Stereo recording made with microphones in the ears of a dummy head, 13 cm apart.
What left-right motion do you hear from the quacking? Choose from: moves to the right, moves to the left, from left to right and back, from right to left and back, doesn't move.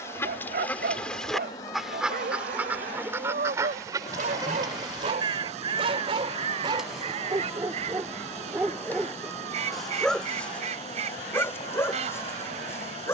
moves to the right.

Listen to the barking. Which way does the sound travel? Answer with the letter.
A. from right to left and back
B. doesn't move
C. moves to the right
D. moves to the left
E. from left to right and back
D.